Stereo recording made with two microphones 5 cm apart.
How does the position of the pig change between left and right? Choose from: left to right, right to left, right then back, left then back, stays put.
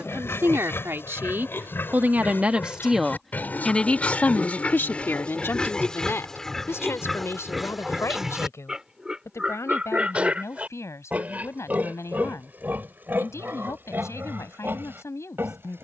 left to right.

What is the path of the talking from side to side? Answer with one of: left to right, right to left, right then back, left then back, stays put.
right to left.